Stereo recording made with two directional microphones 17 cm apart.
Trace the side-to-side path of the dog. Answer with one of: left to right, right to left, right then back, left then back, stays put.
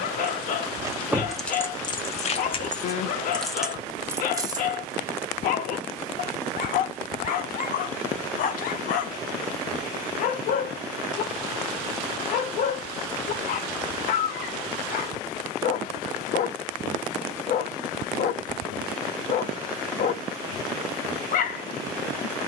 stays put.